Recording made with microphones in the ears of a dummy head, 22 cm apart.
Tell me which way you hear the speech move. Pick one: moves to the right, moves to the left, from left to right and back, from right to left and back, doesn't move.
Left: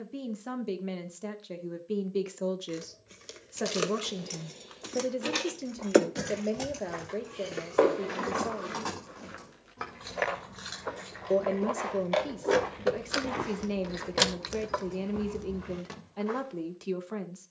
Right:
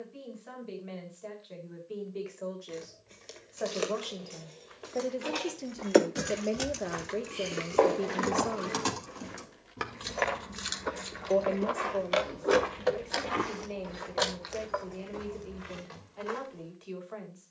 from left to right and back.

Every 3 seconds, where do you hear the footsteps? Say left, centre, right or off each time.
off, right, centre, centre, right, right.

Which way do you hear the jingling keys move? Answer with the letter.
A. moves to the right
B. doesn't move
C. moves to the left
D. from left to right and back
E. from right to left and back
D.